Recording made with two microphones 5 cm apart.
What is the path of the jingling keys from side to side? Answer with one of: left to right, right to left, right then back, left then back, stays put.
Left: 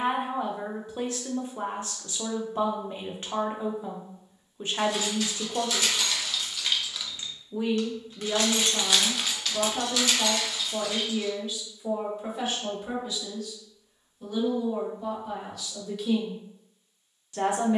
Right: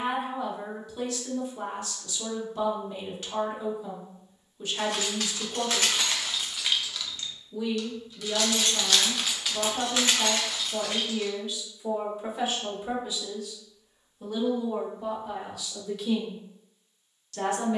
left then back.